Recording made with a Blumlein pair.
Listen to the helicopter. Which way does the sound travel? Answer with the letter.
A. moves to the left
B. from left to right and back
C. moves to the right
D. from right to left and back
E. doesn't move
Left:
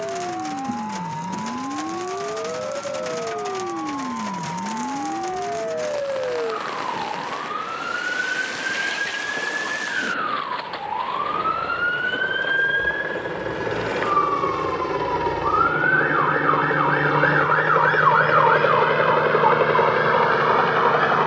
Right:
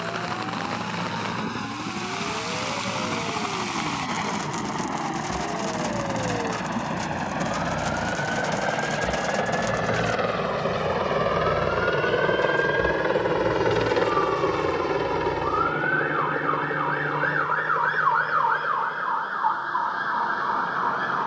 A.